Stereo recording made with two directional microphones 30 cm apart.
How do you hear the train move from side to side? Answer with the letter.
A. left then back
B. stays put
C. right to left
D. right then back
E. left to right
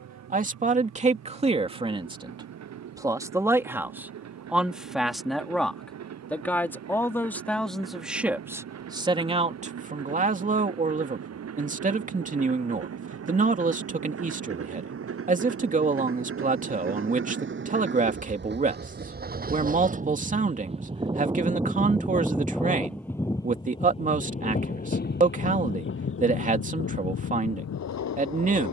C.